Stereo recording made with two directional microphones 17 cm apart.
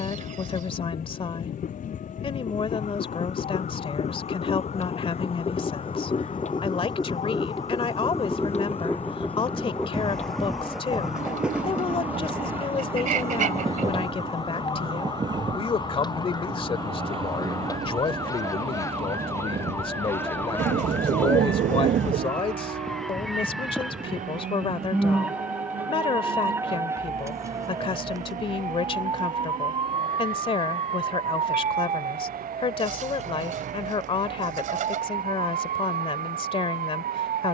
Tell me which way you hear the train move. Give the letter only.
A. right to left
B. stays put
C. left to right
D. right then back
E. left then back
C.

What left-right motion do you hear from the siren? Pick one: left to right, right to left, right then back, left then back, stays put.
left to right.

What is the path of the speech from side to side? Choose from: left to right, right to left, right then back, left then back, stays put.
stays put.